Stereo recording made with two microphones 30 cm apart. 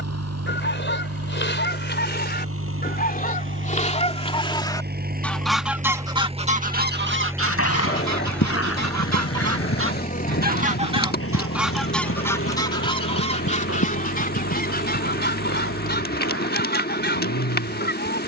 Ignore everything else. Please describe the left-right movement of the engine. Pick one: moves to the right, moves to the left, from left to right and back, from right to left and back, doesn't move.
moves to the left.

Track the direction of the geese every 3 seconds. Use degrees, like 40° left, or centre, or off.
40° left, 10° left, 50° right, 30° right, 20° left, 30° left.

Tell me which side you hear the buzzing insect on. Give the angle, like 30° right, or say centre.
30° left.